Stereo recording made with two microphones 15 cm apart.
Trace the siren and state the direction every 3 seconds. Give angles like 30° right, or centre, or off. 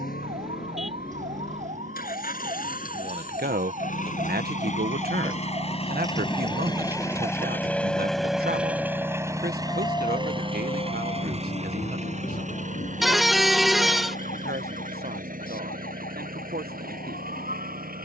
50° right, 40° right, 10° right, 30° left, 60° left, 70° left.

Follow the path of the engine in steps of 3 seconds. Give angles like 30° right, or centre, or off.
70° left, 50° left, 10° left, 30° right, 50° right, 60° right.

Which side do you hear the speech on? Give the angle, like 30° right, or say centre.
80° right.